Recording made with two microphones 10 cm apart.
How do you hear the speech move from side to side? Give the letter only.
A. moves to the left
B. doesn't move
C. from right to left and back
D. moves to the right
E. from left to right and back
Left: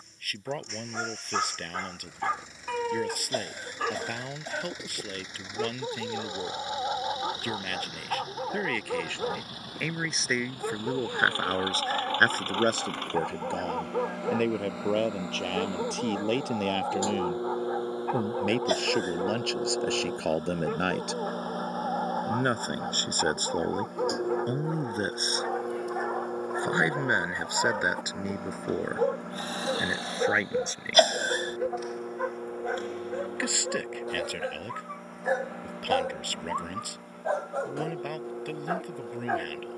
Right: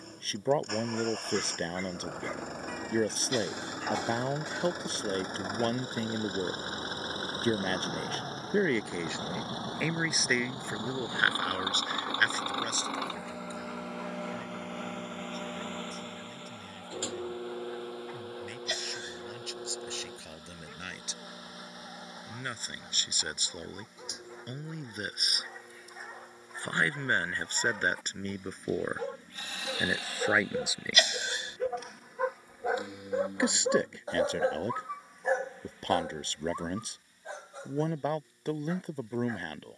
C.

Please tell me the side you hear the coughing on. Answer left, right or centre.
left.